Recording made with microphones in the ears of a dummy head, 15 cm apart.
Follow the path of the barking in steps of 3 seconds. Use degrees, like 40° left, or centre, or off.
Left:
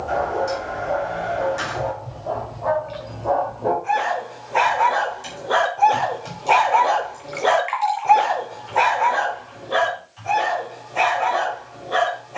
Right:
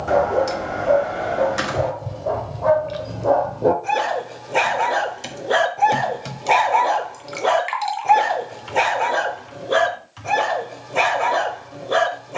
60° right, 40° right, 10° right, 60° right.